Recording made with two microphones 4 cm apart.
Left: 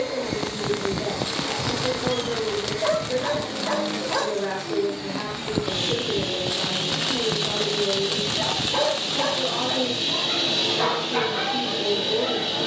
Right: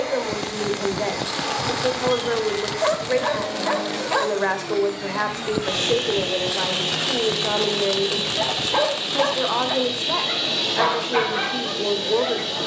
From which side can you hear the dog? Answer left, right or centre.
right.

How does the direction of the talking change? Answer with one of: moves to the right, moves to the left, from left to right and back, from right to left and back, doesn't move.
doesn't move.